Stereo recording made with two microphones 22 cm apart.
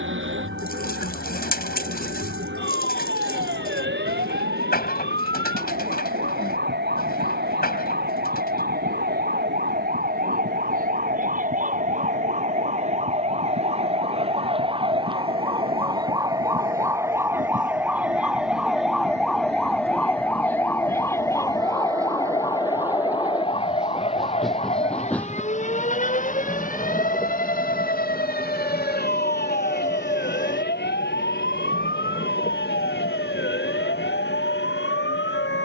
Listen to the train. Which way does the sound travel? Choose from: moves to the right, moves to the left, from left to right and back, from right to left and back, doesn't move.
moves to the left.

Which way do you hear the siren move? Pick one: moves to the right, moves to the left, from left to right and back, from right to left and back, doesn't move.
moves to the left.